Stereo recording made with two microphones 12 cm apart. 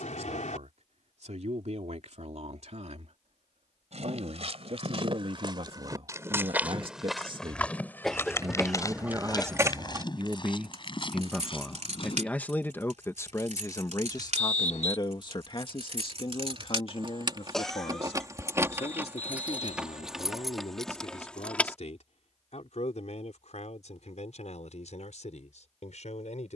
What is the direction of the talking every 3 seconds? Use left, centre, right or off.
right, right, right, centre, left, left, left, left, left.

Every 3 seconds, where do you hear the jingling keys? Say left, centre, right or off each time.
off, off, centre, right, right, right, centre, centre, off.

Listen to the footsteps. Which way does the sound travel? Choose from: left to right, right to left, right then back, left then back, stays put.
right to left.